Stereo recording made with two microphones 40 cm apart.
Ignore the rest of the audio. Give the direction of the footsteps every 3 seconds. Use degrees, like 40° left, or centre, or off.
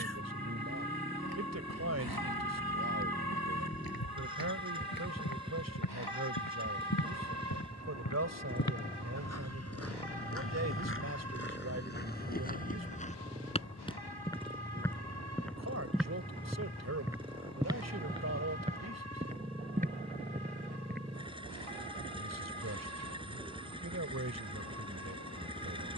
70° left, 60° left, 50° left, 30° left, 20° left, centre, 20° right, off, off.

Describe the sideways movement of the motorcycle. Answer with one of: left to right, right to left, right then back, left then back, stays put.
stays put.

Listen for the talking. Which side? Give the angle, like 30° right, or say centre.
40° right.